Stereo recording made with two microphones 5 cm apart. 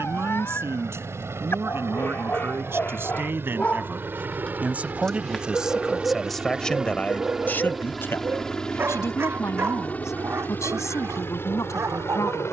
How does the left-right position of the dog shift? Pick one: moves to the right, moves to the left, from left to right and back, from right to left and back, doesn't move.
moves to the right.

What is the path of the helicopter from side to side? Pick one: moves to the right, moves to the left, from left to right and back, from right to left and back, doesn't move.
moves to the left.